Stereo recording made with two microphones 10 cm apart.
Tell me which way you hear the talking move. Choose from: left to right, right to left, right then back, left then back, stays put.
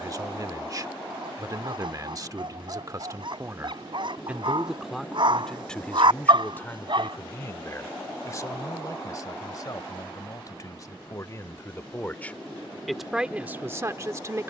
left then back.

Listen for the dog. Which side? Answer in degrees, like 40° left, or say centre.
60° right.